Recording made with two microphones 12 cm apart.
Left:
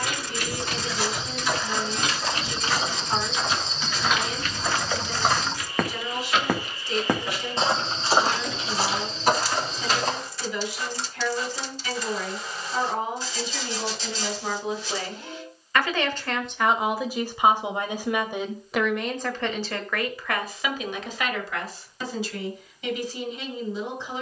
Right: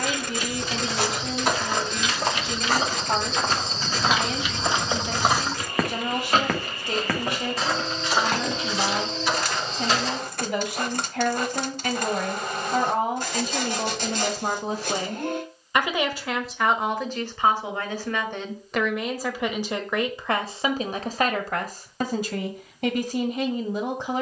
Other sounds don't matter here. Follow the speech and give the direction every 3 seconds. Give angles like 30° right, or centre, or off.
60° right, 60° right, 60° right, 60° right, 50° right, centre, 10° right, 50° right.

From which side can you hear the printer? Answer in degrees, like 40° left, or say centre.
60° right.